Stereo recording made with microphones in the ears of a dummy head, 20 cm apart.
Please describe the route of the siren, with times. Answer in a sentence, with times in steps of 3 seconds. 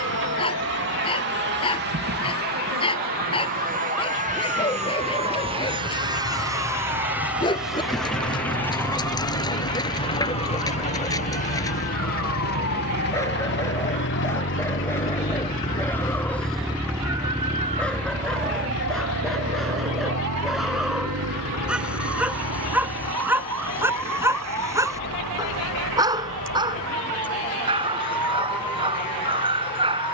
In this clip you hear the siren on the left from 0 s, in the centre from 15 s and on the right from 18 s.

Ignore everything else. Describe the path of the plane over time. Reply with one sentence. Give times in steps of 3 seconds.
You can hear the plane on the right from 0 s, in the centre from 6 s and on the left from 9 s.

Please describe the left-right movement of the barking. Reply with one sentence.
You can hear the barking travel towards the right.